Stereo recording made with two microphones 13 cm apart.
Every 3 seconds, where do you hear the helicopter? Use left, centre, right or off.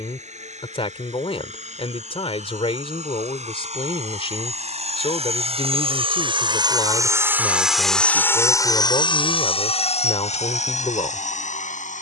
right, right, centre, left.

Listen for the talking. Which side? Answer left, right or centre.
left.